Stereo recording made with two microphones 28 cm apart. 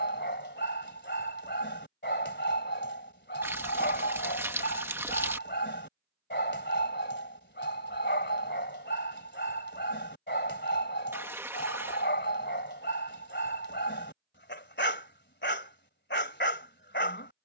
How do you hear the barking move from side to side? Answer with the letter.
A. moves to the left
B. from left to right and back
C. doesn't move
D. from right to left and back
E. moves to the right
C.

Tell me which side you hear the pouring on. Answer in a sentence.
You can hear the pouring in the centre.